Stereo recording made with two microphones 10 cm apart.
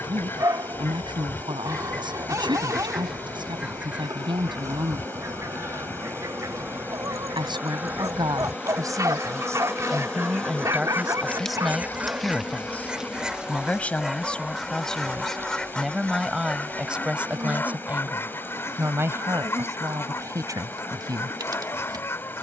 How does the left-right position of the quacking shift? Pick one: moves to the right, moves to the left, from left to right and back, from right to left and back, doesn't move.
from left to right and back.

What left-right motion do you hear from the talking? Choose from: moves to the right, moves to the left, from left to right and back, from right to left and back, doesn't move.
from right to left and back.